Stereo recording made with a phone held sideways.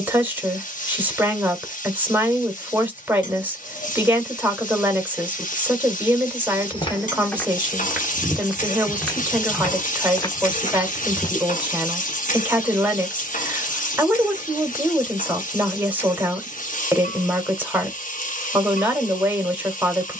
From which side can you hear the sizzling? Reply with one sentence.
You can hear the sizzling on the left.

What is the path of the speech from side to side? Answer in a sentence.
You can hear the speech stay in one place.